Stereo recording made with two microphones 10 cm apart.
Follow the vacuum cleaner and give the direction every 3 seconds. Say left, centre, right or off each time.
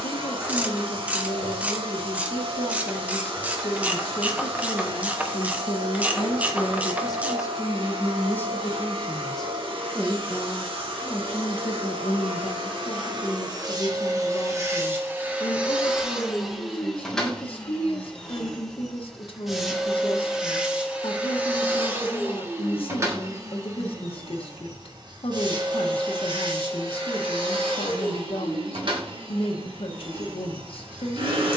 right, right, right, right, right, centre, centre, right, right, right, right.